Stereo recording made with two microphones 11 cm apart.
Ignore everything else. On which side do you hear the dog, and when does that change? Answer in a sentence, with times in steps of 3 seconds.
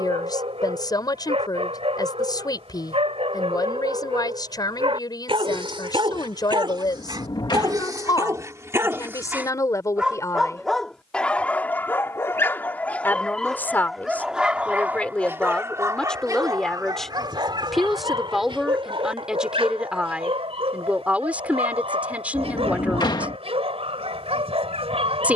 In this clip you hear the dog on the right from 0 s, in the centre from 9 s and on the right from 15 s.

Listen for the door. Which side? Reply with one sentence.
You can hear the door on the left.